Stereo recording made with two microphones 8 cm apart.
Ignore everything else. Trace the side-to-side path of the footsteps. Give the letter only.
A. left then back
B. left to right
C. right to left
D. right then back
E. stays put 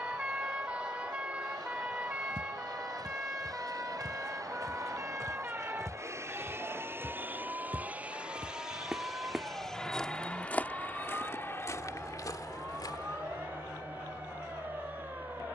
C.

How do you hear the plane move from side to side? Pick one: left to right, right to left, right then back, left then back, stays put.
right to left.